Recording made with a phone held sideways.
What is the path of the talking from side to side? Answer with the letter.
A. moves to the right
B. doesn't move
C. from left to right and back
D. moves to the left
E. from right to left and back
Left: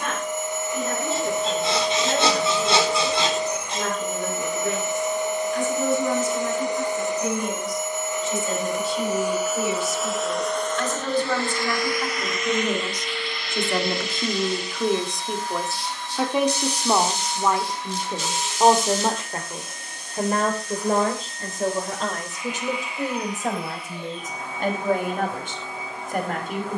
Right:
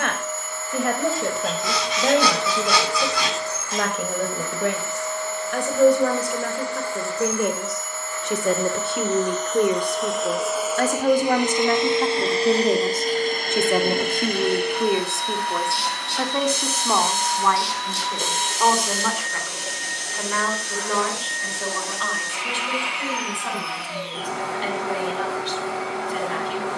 D.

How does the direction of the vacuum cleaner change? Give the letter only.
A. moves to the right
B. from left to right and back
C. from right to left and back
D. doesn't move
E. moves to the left
A.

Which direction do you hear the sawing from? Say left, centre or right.
left.